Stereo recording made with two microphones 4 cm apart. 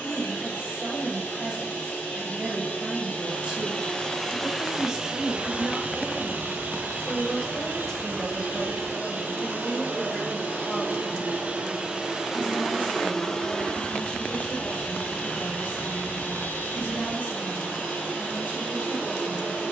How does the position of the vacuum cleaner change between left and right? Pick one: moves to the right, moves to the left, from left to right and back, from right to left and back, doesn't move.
from left to right and back.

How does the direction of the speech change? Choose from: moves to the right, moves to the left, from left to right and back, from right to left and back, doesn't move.
moves to the left.